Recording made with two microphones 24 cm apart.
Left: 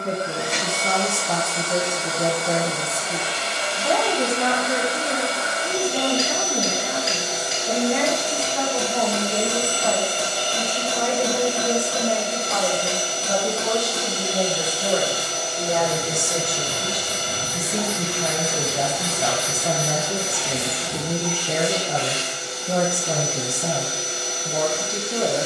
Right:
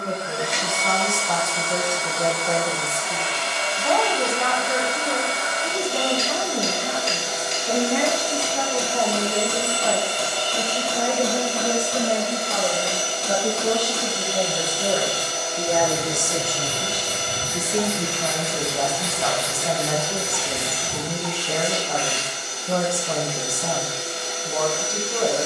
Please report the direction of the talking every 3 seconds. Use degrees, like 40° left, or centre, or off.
20° left, 10° left, centre, 10° right, 10° right, centre, 20° left, 20° left, 20° left.